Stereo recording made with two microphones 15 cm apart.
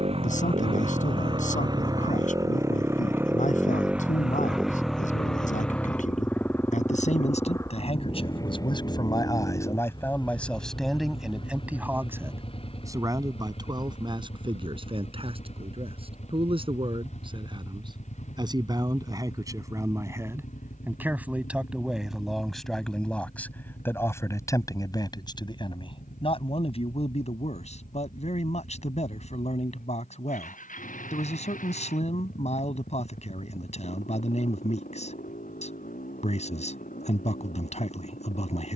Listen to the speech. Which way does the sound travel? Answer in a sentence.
In this clip you hear the speech go right and come back.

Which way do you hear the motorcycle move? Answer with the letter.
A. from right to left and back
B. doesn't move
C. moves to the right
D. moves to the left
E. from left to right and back
D.